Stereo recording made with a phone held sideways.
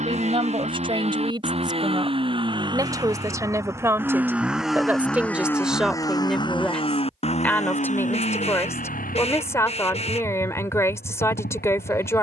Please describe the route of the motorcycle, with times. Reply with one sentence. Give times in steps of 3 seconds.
In this clip you hear the motorcycle on the right from 0 s, in the centre from 3 s and on the left from 6 s.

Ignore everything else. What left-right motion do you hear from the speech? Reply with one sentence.
You can hear the speech travel towards the left.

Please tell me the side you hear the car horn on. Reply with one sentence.
You can hear the car horn on the left.